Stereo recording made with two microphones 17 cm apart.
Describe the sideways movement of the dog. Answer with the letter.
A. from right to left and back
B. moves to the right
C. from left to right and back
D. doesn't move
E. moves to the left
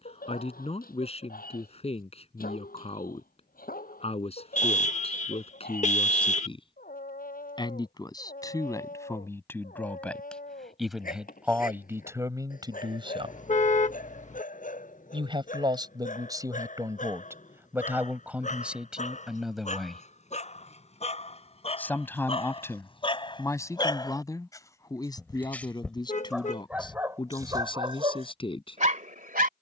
B.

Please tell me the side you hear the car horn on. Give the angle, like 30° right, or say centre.
40° left.